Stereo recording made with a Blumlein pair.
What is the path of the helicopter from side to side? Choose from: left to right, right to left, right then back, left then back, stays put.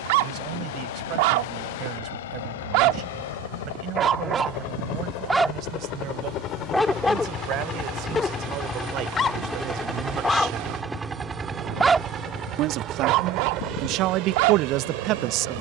left to right.